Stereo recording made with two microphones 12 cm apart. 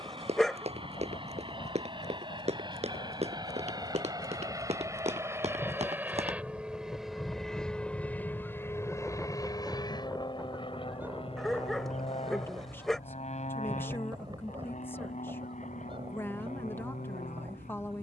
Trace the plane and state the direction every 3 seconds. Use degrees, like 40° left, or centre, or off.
50° right, 30° right, centre, 40° left, 60° left, 70° left.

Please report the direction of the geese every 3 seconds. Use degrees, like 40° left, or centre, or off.
50° left, 40° left, 20° left, 10° right, 30° right, 50° right.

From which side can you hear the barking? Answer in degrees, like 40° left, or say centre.
centre.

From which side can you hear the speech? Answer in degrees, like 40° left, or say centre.
20° left.